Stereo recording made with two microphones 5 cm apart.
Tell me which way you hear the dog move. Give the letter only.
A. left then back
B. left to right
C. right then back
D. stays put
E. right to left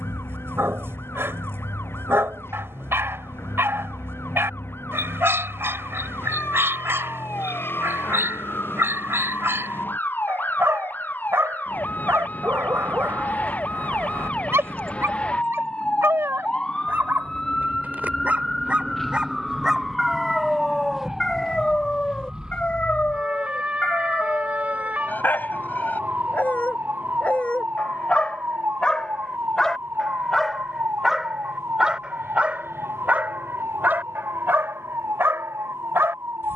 A.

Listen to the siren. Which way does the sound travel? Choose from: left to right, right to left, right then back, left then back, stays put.
left to right.